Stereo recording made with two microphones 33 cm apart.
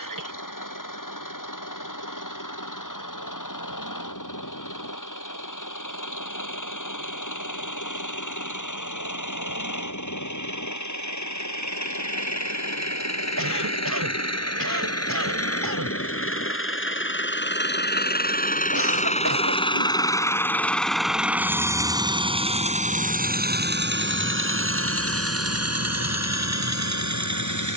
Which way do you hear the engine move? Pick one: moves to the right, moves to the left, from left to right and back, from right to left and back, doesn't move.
moves to the right.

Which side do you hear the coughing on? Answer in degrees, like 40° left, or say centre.
70° right.